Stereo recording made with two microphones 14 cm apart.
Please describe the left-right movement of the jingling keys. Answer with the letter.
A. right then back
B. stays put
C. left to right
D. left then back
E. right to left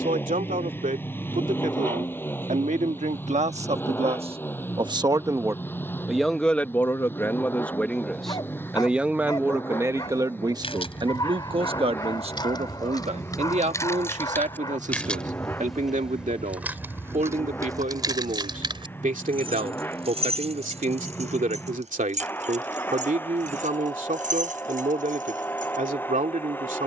C.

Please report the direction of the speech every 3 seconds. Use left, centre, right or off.
right, right, centre, right, right, right, right, right, right.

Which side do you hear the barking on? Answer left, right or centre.
left.